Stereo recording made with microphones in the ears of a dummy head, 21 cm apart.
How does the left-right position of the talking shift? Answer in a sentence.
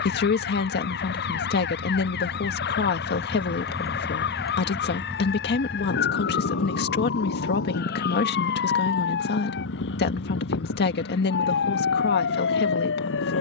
You can hear the talking stay in one place.